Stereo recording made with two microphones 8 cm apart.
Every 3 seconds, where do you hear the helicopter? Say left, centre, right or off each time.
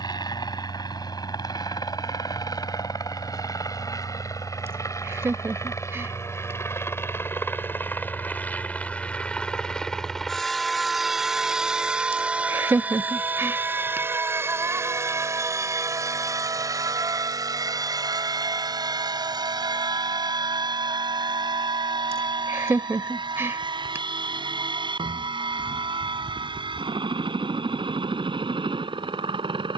left, left, left, centre, right, right, right, right, right, right.